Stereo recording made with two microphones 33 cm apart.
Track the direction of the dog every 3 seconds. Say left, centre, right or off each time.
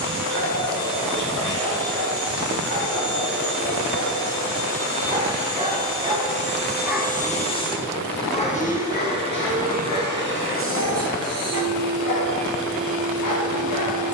right, right, centre, left, left.